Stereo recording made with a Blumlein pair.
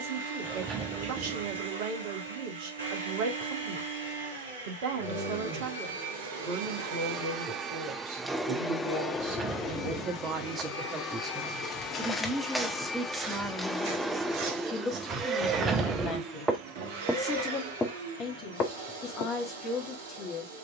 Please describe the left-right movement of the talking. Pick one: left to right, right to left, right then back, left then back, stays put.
right to left.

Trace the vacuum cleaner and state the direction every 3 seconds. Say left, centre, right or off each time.
right, right, right, left, centre, right, right.